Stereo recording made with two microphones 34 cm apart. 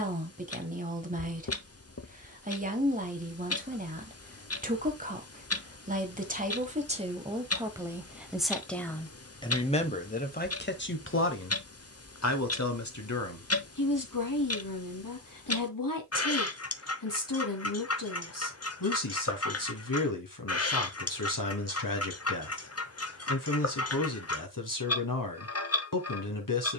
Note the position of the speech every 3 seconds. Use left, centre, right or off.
right, right, centre, left, left, left, left, left, left.